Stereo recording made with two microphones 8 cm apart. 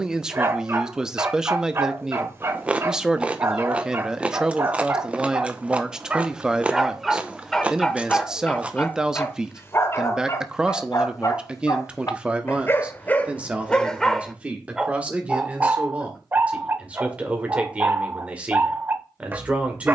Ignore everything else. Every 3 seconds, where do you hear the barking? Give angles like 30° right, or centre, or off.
30° right, 30° right, 10° left, 40° left, 20° left, 20° right, 30° right.